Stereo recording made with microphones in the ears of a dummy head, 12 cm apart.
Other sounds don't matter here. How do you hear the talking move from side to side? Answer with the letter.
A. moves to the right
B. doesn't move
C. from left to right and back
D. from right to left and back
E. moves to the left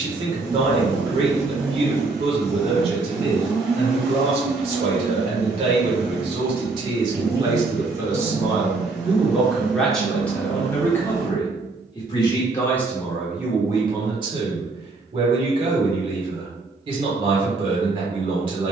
D.